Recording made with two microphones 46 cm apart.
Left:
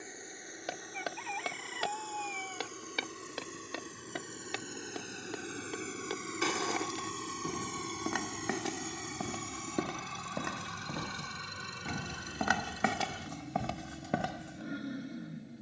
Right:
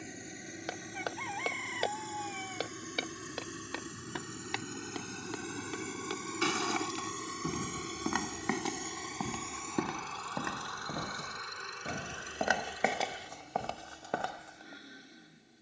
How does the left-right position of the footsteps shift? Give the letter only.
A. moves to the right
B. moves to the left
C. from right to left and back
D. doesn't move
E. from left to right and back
E.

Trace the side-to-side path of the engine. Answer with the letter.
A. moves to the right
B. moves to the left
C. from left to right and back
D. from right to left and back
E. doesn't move
B.